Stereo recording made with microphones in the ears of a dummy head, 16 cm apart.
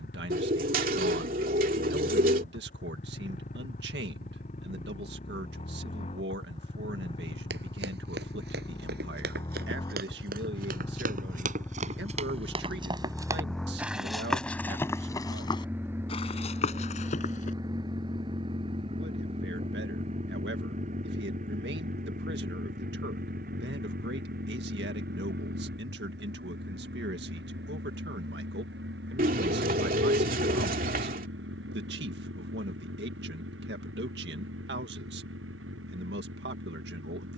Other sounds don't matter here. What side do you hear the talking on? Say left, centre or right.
right.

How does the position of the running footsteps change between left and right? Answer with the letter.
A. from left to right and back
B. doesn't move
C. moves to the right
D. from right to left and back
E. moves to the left
E.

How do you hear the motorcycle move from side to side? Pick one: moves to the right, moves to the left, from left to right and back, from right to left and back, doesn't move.
moves to the right.